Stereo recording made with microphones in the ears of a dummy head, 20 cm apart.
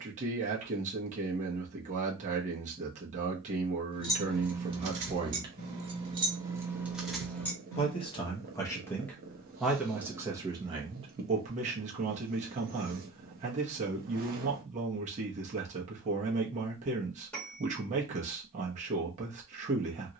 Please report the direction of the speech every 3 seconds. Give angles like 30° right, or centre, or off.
30° right, 30° right, 20° left, 20° right, 30° right, 30° right, 30° right.